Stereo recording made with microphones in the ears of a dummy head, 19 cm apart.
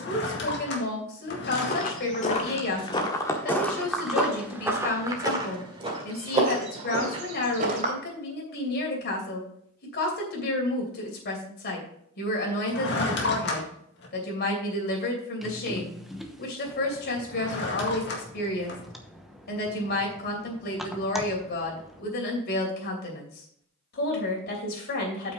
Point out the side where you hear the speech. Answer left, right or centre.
left.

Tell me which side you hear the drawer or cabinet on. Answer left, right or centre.
left.